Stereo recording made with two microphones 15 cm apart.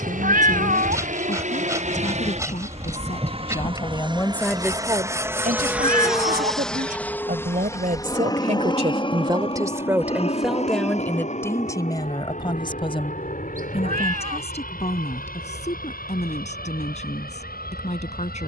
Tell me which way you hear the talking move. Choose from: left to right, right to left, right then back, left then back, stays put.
right then back.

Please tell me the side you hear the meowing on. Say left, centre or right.
right.